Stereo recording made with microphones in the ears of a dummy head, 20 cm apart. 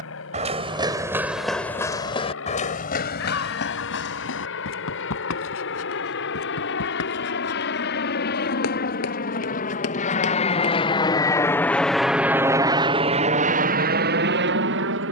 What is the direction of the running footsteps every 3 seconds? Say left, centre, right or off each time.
centre, left, left, left, off.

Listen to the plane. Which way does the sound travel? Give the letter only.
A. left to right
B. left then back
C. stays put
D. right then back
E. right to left
A.